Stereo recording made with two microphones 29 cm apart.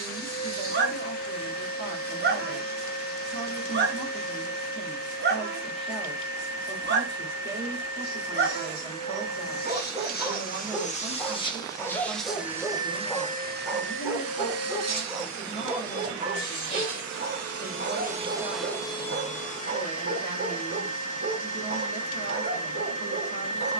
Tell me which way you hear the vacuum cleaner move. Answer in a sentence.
In this clip you hear the vacuum cleaner go right and come back.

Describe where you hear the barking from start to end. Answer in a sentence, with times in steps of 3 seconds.
You can hear the barking on the right from 0 s, in the centre from 9 s and on the right from 15 s.